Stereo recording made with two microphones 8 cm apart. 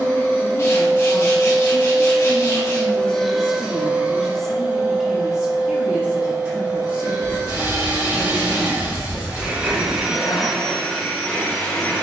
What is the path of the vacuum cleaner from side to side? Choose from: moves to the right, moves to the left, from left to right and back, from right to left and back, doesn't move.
from left to right and back.